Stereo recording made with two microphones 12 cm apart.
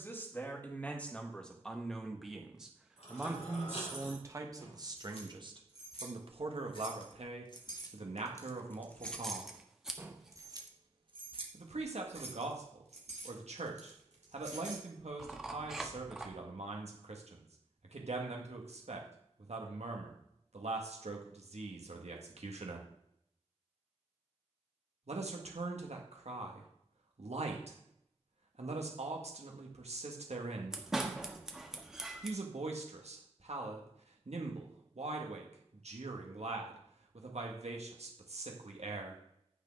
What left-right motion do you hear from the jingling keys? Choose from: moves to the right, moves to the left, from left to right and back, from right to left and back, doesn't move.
moves to the right.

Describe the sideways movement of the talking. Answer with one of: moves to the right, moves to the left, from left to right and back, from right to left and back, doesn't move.
moves to the right.